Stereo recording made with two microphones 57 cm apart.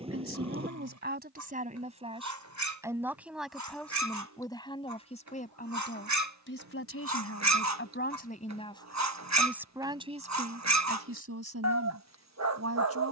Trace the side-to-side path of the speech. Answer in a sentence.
In this clip you hear the speech move from right to left and back again.